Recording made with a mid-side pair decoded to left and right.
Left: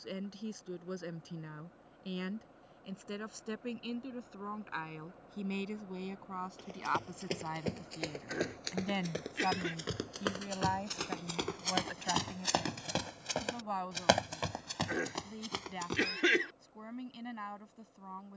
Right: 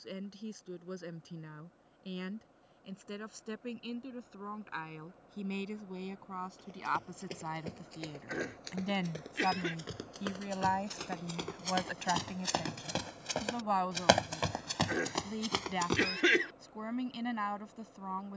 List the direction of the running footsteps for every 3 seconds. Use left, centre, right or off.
off, off, left, left, centre, right.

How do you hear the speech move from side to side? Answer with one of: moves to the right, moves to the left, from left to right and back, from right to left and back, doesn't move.
moves to the right.